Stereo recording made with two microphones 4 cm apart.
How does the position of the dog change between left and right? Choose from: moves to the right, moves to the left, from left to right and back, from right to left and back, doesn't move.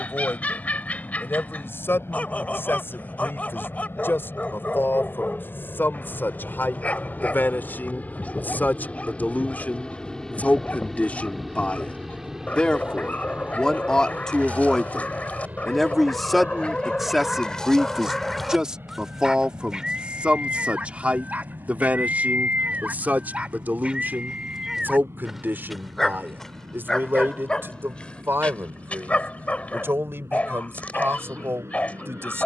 from left to right and back.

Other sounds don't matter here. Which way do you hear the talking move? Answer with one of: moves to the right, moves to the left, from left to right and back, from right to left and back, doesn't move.
moves to the right.